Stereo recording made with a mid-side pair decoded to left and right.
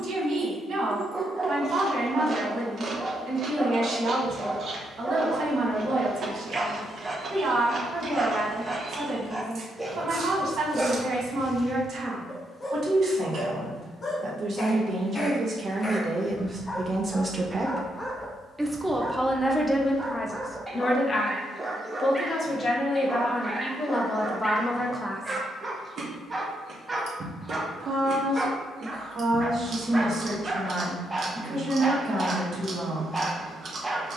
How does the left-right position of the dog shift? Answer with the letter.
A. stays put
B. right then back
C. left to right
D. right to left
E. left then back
E.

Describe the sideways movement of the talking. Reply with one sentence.
You can hear the talking move from right to left and back again.